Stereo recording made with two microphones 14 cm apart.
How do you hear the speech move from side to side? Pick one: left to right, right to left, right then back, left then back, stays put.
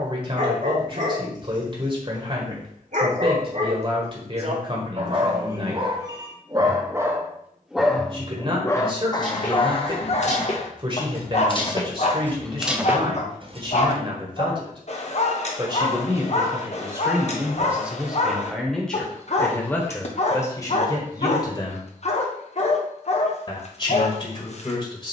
right to left.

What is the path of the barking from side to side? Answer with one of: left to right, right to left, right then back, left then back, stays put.
right to left.